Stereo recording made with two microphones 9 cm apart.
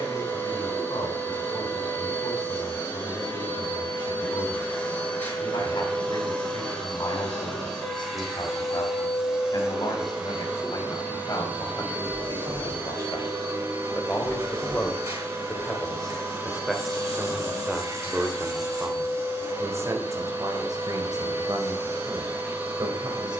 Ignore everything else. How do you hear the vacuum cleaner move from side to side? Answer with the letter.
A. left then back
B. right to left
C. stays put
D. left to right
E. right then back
D.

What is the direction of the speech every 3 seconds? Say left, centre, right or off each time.
left, left, left, left, left, centre, right, right.